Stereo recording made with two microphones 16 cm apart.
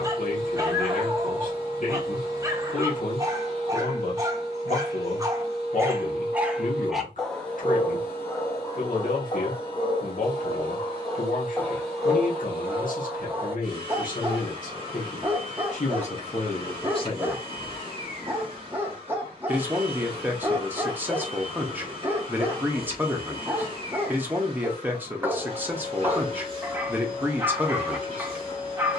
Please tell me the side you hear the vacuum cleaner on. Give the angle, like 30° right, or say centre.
30° left.